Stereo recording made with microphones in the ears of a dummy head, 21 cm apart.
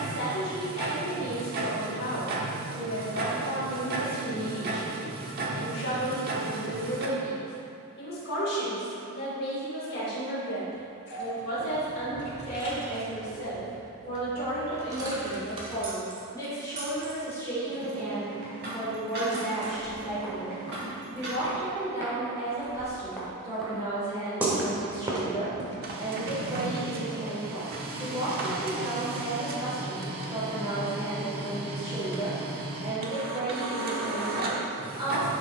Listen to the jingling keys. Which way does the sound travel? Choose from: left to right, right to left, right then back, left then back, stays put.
left to right.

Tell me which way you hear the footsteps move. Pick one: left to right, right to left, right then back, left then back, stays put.
left to right.